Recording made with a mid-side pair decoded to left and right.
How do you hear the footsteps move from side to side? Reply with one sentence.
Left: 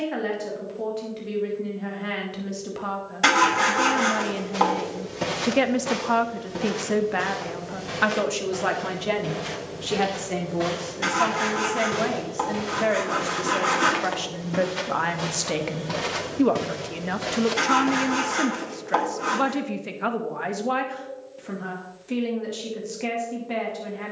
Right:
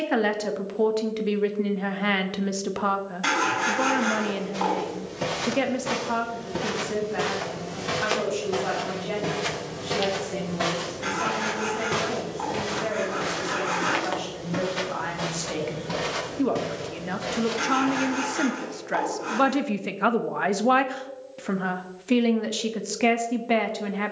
You can hear the footsteps move from left to right and back again.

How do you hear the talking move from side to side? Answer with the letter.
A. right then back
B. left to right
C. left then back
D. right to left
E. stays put
C.